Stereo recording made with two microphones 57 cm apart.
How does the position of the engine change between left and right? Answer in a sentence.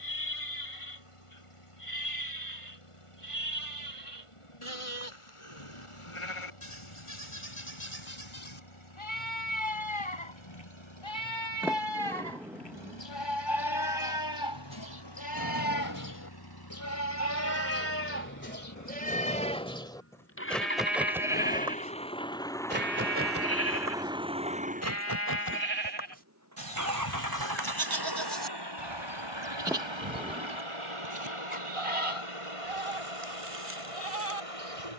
You can hear the engine go from the left side to the right.